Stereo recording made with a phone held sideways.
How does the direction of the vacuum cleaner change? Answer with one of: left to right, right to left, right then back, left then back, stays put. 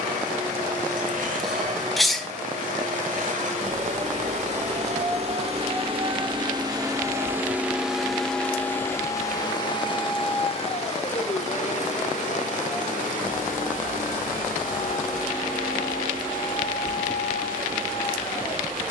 right to left.